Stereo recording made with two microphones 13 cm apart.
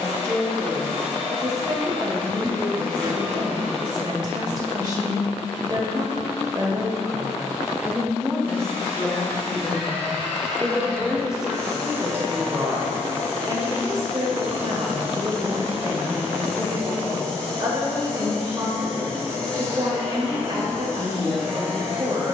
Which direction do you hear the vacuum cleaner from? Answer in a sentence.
You can hear the vacuum cleaner in the centre.